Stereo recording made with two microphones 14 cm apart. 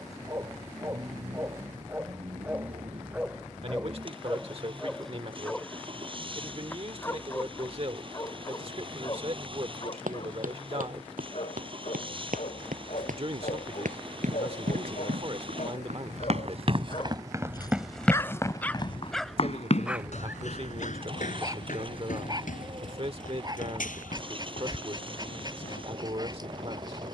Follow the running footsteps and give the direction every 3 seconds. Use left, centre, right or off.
off, off, off, right, right, right, left, left, left.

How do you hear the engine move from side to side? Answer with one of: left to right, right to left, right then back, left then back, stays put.
stays put.